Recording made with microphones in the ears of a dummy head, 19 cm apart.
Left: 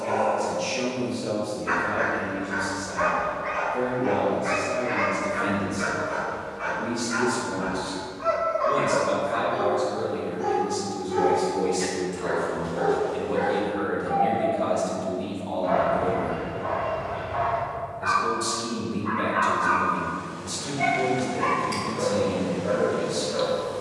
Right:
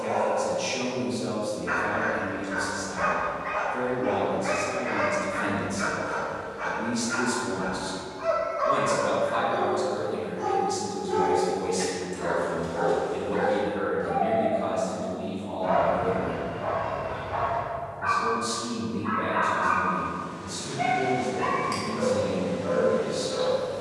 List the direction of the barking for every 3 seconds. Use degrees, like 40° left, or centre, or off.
10° left, 10° right, 40° right, 60° right, 60° right, 50° right, 20° right, 10° left.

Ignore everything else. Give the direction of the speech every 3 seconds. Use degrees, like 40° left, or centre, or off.
40° right, 40° right, 40° right, 30° right, 10° left, 30° left, 40° left, 40° left.